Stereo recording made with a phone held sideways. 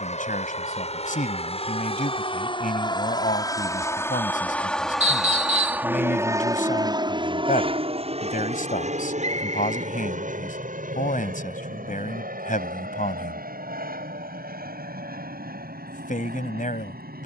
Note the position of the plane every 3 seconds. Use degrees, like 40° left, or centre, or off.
50° left, 10° left, 30° right, 60° right, 70° right, 70° right.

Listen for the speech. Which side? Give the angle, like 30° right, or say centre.
70° left.